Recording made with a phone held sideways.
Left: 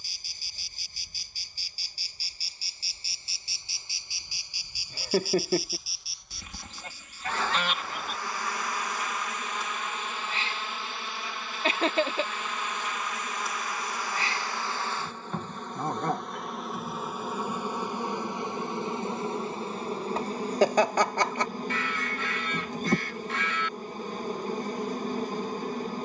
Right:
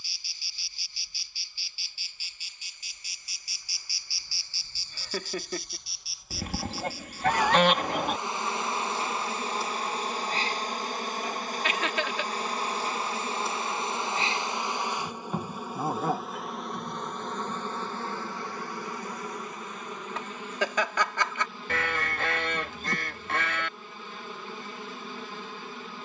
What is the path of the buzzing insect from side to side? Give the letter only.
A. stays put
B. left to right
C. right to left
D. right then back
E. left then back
D.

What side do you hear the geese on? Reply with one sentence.
In this clip you hear the geese on the right.